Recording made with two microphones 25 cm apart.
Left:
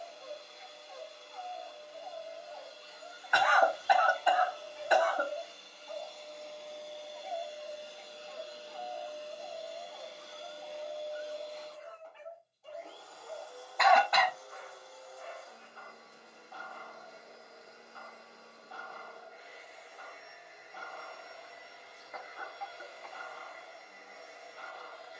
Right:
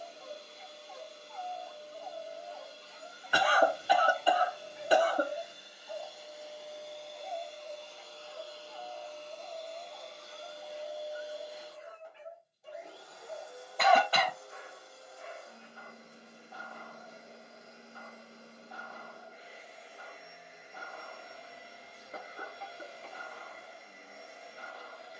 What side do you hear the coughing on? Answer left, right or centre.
right.